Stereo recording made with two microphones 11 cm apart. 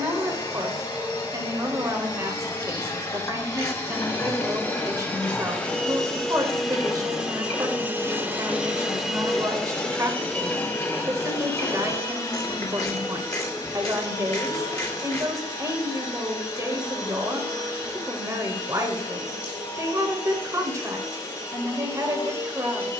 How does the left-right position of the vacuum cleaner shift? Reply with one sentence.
In this clip you hear the vacuum cleaner move from left to right and back again.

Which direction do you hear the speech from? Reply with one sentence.
In this clip you hear the speech on the right.